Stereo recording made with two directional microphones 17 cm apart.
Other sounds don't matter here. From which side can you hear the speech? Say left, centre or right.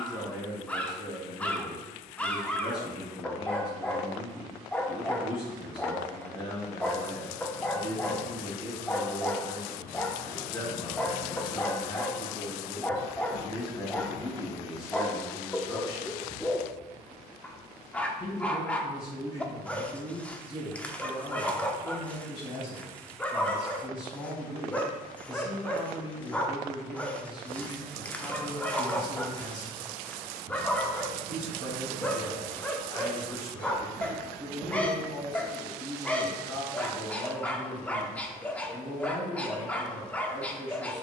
left.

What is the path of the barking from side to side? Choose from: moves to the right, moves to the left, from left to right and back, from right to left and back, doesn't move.
doesn't move.